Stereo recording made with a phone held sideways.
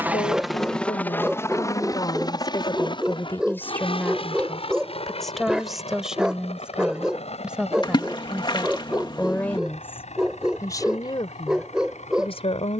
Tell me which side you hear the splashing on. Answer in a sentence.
You can hear the splashing on the left.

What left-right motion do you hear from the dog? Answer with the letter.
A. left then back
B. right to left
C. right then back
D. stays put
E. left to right
D.